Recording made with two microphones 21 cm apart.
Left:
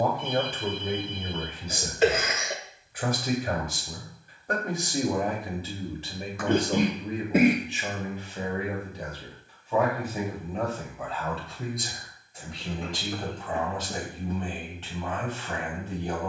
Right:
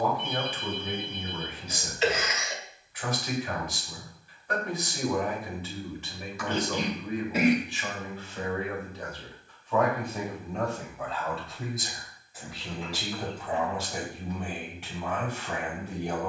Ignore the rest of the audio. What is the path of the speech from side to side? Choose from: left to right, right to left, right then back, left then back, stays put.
left to right.